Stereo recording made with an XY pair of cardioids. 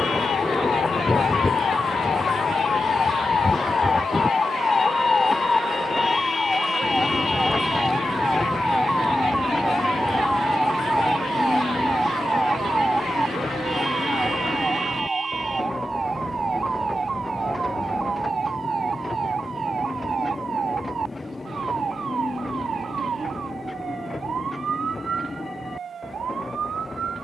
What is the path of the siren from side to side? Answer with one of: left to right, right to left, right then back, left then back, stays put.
left to right.